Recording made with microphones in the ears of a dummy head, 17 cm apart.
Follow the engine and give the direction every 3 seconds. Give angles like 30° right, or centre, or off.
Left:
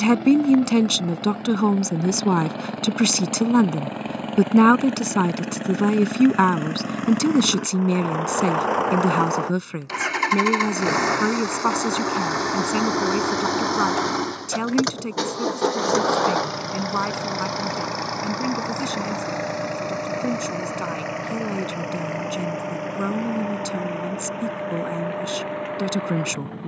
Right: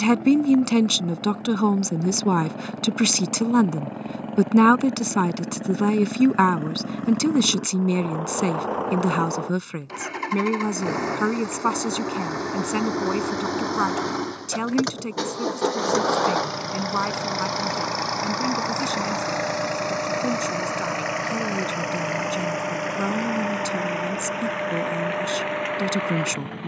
70° left, 60° left, 60° left, 40° left, 20° left, centre, 30° right, 40° right, 50° right.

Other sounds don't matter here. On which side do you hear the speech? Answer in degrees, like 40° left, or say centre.
10° right.